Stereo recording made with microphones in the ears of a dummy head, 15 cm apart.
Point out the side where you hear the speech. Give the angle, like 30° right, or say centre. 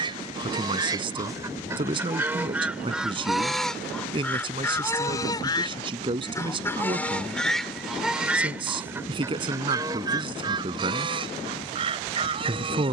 30° right.